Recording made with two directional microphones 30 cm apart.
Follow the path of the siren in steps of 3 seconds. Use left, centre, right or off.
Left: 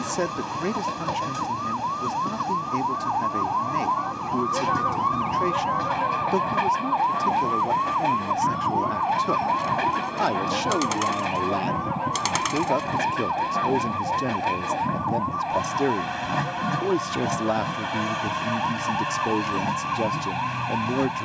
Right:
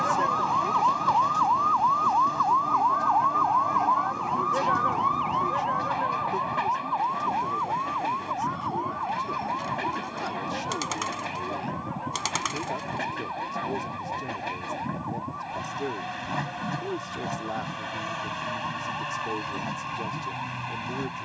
right, centre, left, left, left, left, left.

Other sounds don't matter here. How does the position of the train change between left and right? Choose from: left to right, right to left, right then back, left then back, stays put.
stays put.